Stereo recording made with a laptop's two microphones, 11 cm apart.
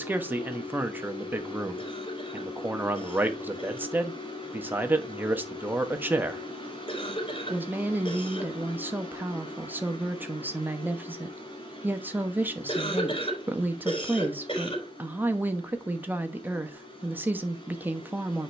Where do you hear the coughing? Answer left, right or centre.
left.